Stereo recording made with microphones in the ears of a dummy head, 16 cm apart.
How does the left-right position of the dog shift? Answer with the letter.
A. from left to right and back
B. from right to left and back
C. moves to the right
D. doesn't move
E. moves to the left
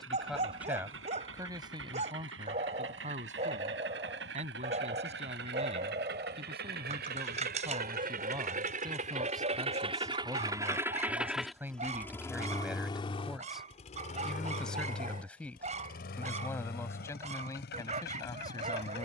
D.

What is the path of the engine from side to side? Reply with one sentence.
In this clip you hear the engine move to the left.